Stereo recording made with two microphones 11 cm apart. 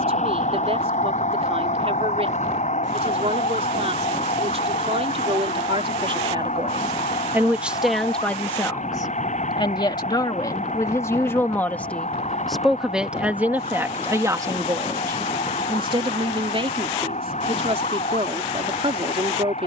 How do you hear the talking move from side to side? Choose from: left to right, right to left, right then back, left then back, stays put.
left then back.